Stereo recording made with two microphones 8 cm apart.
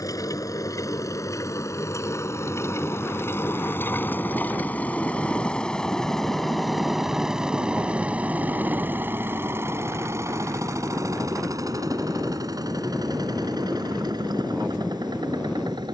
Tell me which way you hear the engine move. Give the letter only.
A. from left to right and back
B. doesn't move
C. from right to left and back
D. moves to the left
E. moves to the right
E.